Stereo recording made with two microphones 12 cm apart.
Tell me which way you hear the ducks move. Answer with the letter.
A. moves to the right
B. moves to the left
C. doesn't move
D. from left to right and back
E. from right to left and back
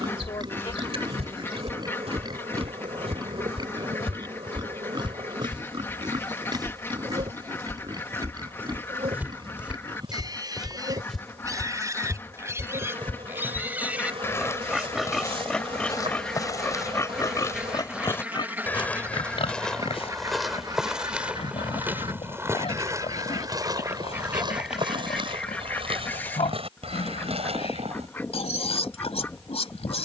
D.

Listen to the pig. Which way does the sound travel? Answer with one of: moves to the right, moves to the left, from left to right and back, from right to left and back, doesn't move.
moves to the left.